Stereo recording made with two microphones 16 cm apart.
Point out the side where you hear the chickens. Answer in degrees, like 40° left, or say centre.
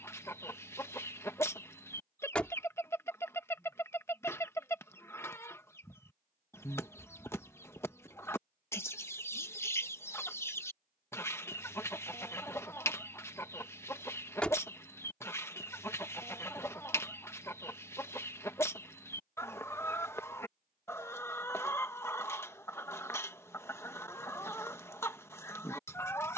20° left.